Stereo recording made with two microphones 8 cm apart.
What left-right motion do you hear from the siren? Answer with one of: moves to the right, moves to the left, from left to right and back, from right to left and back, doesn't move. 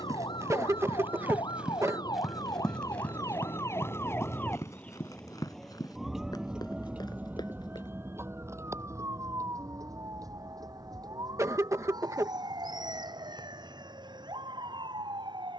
moves to the right.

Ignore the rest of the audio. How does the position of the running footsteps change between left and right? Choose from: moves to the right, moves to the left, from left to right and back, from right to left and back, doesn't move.
moves to the left.